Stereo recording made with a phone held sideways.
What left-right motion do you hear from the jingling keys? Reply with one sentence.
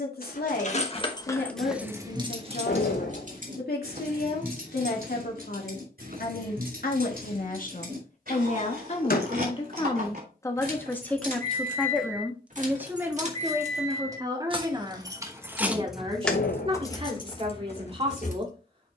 In this clip you hear the jingling keys move from left to right and back again.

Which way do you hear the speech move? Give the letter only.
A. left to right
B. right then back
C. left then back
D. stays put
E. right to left
A.